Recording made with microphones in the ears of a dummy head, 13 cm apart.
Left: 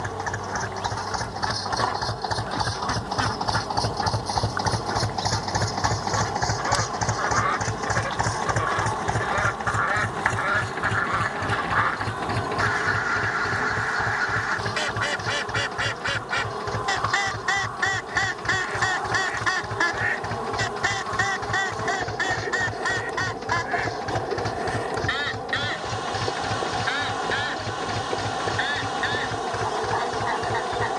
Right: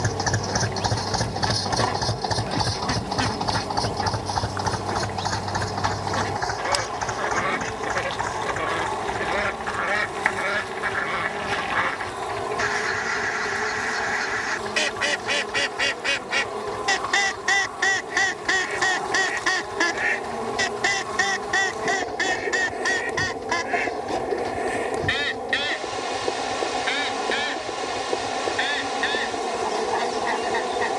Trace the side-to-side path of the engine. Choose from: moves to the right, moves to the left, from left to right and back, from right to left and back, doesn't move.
moves to the left.